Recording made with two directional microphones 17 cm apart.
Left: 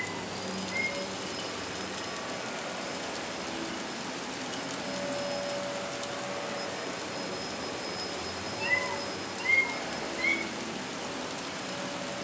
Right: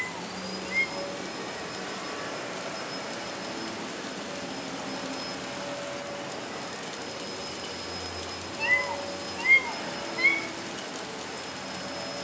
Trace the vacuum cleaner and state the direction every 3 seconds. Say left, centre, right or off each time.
right, right, centre, right.